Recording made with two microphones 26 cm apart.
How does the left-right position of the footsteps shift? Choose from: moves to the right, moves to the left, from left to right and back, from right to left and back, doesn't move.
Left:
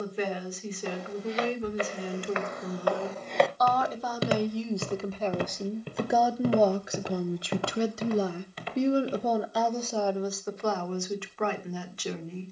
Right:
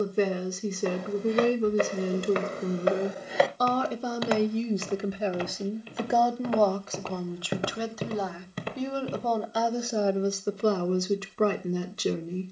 from right to left and back.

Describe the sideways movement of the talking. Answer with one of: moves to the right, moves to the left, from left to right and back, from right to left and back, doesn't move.
from right to left and back.